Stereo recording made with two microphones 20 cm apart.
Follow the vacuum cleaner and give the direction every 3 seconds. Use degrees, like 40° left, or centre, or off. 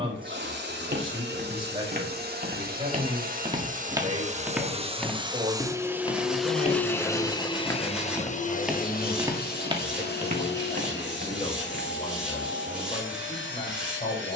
60° right, 30° right, 20° left, 60° left, 70° left.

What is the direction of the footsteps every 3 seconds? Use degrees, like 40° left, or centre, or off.
50° right, 10° right, 10° left, 40° right, off.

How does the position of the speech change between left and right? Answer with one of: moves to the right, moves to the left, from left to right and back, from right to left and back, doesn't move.
moves to the left.